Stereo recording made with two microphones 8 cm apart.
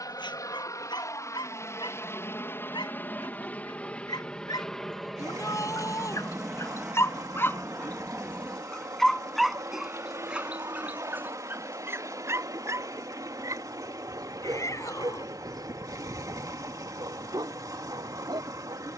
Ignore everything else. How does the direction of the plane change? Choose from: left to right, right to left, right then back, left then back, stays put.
left to right.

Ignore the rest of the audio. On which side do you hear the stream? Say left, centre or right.
right.